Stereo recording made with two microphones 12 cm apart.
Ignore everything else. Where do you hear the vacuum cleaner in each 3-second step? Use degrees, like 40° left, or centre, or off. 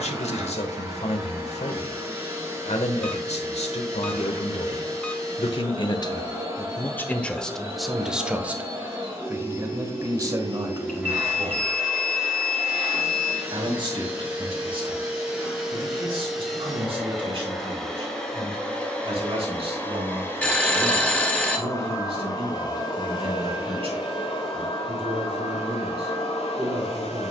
20° right, 20° right, 20° right, 20° right, 10° right, centre, 10° left, 40° left, 60° left.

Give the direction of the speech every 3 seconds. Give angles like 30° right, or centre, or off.
70° left, 60° left, 10° left, 30° right, 50° right, 50° right, 50° right, 50° right, 50° right.